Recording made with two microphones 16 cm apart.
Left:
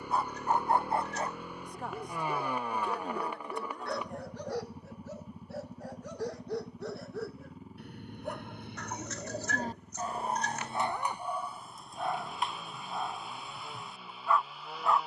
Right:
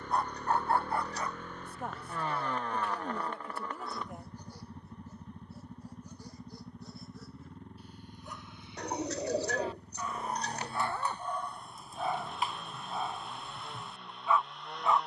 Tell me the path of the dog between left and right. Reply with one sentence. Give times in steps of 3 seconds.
You can hear the dog on the left from 0 s and in the centre from 12 s.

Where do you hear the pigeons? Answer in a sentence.
In this clip you hear the pigeons on the right.